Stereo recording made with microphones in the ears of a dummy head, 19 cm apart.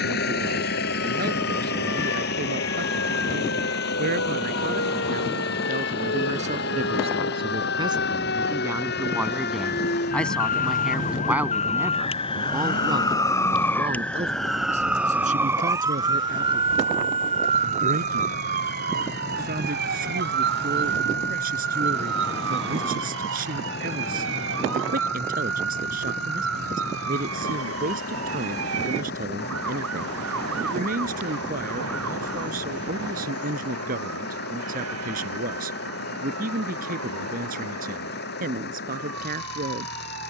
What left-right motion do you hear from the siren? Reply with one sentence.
You can hear the siren move to the right.